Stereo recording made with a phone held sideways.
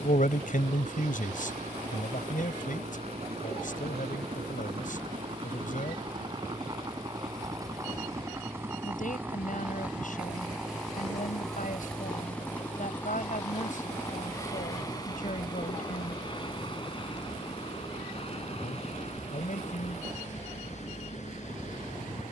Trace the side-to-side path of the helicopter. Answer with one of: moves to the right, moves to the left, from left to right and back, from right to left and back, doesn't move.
moves to the left.